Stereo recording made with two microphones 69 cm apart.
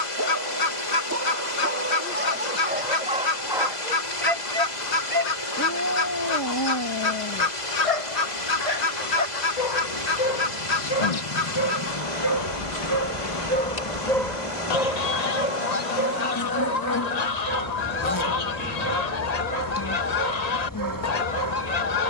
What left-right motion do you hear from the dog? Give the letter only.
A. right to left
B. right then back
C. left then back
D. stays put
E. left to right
C.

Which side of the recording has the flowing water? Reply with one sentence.
In this clip you hear the flowing water on the left.